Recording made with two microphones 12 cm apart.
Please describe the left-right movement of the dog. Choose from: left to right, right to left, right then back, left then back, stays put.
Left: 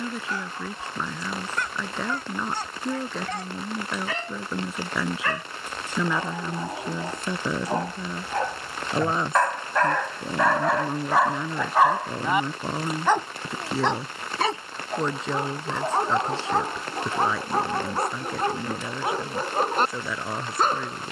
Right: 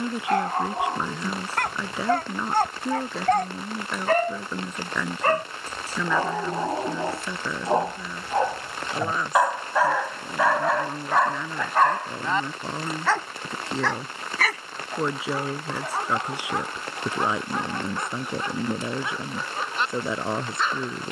right to left.